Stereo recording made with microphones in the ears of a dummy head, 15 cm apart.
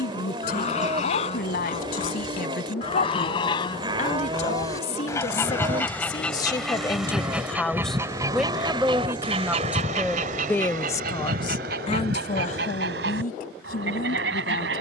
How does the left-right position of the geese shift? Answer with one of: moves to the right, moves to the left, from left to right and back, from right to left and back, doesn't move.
moves to the right.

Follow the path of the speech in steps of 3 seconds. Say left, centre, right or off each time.
left, left, centre, centre, left.